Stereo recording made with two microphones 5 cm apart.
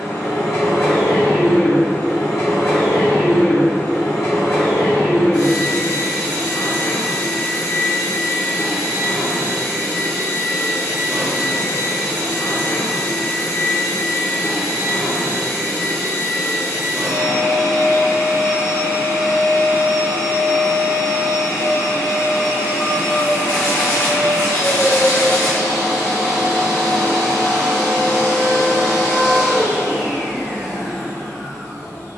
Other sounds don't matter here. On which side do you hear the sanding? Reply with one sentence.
You can hear the sanding on the left.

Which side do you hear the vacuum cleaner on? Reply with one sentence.
In this clip you hear the vacuum cleaner on the left.